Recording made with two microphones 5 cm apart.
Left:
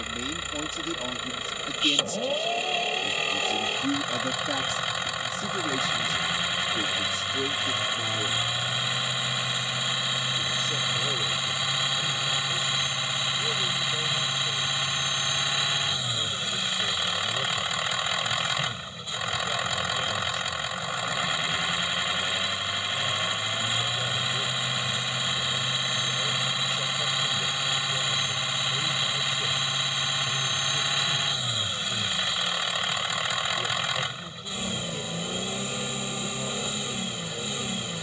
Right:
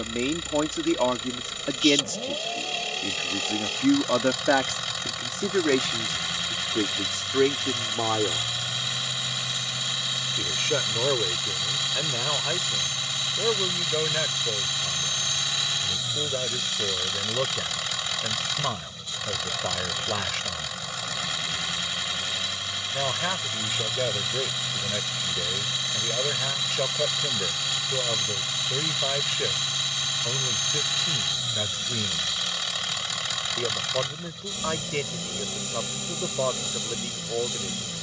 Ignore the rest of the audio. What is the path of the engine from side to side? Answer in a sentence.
You can hear the engine stay put.